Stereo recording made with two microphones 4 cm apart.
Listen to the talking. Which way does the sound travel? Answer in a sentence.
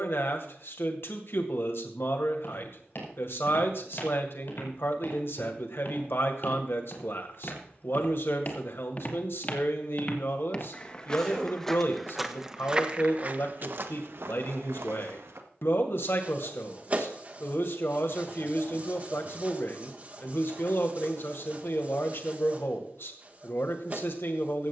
You can hear the talking stay put.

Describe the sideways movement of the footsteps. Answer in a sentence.
In this clip you hear the footsteps travel towards the right.